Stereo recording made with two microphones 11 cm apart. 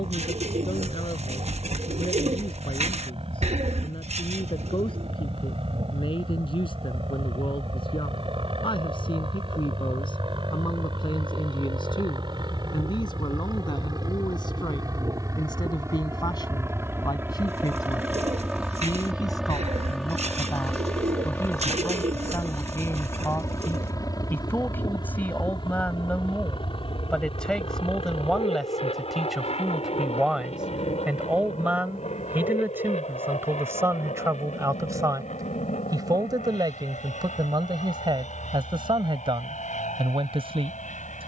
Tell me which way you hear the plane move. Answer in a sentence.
In this clip you hear the plane move from right to left.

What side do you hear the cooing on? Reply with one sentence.
You can hear the cooing on the right.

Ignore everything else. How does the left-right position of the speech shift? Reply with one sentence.
You can hear the speech move to the right.